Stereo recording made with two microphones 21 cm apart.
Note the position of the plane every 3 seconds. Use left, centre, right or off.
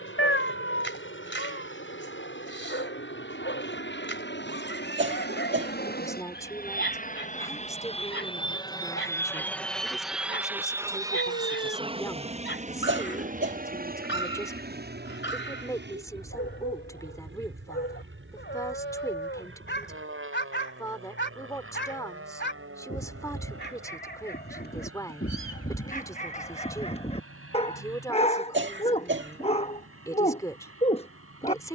left, left, left, centre, right, right, right, right, right, right, right.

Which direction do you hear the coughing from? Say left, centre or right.
right.